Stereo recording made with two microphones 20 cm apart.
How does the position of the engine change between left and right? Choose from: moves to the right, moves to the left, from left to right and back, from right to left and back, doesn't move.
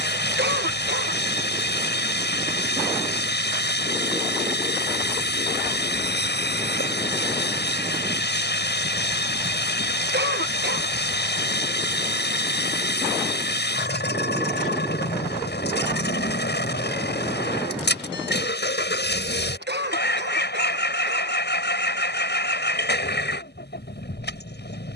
doesn't move.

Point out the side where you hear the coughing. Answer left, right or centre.
right.